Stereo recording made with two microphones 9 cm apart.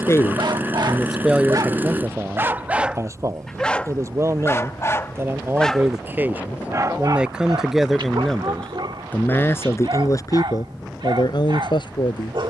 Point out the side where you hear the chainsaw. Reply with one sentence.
You can hear the chainsaw on the right.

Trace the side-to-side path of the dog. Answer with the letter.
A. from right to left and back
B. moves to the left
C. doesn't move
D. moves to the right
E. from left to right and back
A.